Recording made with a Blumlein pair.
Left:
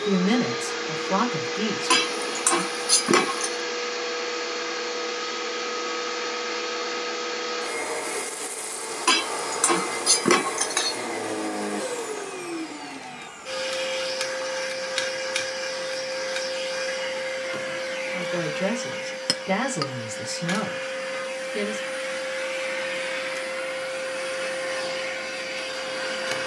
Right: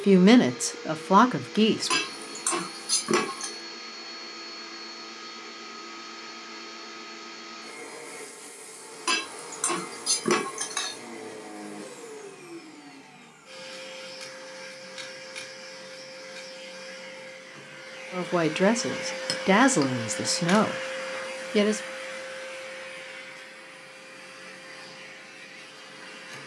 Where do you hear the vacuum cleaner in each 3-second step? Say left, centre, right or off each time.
left, left, left, left, left, left, centre, left, left.